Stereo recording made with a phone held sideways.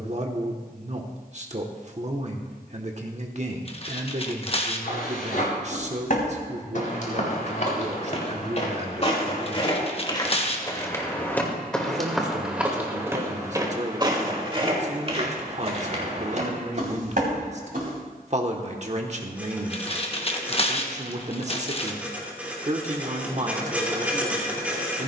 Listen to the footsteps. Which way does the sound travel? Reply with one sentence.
You can hear the footsteps go from the left side to the right.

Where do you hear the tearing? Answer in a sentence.
In this clip you hear the tearing on the left.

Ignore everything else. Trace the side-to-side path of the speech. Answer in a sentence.
In this clip you hear the speech stay in one place.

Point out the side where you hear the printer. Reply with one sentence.
You can hear the printer in the centre.